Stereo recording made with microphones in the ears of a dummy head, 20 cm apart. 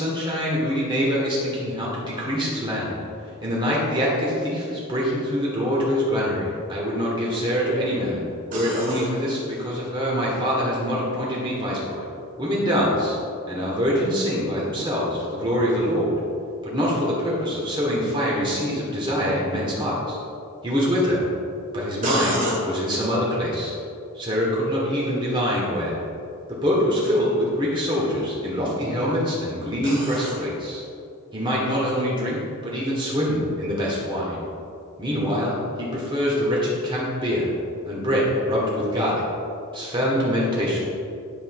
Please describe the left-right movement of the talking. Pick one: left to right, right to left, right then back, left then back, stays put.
stays put.